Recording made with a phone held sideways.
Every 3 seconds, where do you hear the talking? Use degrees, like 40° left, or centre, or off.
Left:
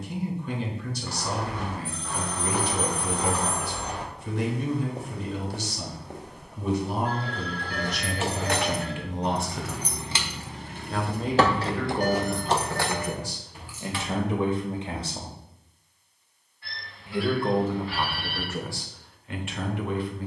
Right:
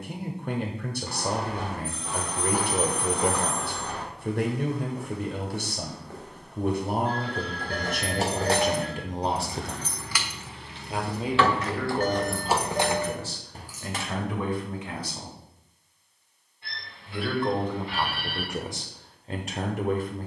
50° right, 50° right, 50° right, 20° right, 20° left, 10° left, 30° right.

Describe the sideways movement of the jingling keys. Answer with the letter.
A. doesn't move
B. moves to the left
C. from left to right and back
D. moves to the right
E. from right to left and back
E.